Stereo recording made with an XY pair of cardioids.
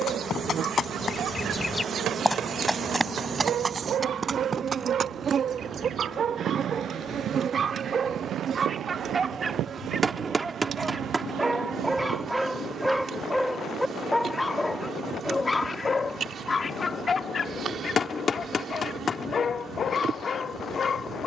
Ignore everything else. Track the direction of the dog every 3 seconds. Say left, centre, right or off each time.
right, right, right, right, centre, left, left.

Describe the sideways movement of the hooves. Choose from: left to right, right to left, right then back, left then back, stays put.
left to right.